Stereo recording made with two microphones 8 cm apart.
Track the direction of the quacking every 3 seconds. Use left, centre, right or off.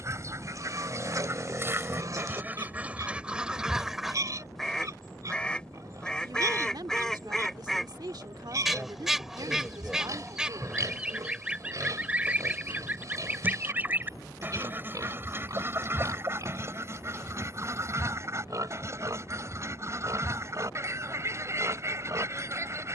right, centre, centre, centre, right, right, right, right.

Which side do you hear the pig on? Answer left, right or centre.
right.